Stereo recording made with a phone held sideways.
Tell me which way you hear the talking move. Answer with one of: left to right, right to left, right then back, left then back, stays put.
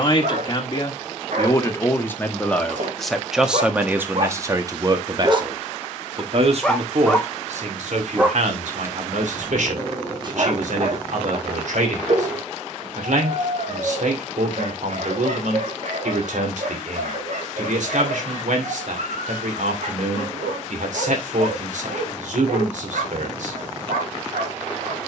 left to right.